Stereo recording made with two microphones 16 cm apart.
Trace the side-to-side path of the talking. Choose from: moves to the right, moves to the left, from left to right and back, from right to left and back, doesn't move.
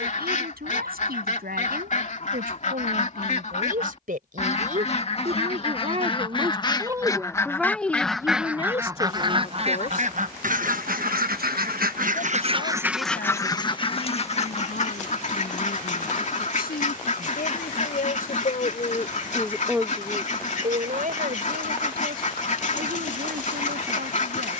from right to left and back.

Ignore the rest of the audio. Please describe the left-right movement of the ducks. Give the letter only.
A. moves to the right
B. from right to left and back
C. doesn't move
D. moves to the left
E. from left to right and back
E.